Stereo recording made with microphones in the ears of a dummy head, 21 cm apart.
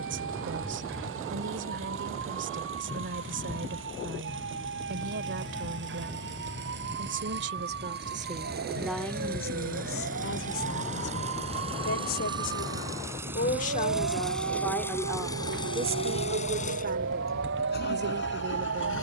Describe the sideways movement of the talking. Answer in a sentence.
In this clip you hear the talking move from right to left and back again.